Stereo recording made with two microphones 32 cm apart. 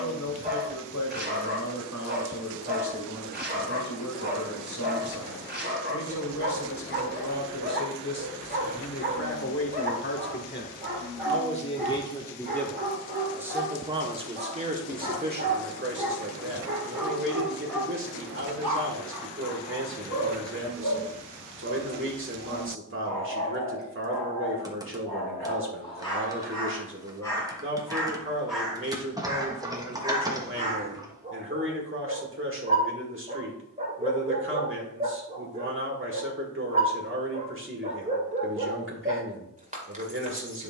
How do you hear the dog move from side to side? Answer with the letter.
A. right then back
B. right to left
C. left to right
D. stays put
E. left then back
E.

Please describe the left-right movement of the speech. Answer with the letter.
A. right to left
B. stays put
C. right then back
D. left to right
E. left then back
D.